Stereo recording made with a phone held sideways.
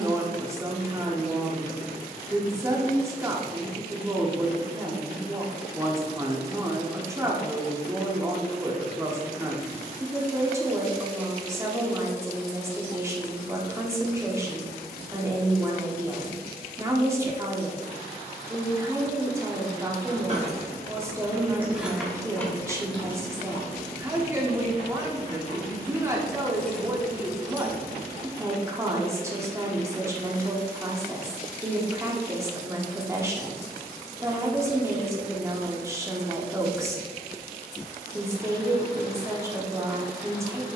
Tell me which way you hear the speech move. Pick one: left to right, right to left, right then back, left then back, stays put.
stays put.